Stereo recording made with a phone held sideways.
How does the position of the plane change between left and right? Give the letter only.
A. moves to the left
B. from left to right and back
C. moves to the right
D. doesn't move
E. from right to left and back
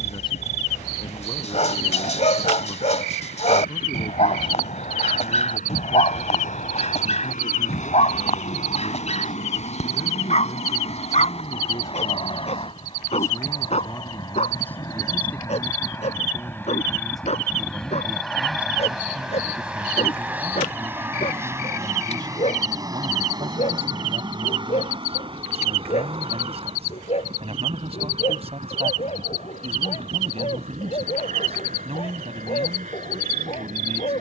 C.